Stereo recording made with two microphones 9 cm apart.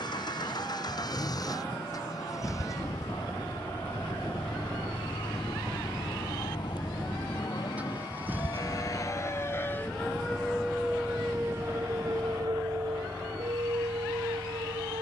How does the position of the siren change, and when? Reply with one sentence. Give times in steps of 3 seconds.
You can hear the siren on the left from 0 s, in the centre from 9 s and on the right from 12 s.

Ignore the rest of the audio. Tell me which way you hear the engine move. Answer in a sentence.
You can hear the engine go from the left side to the right.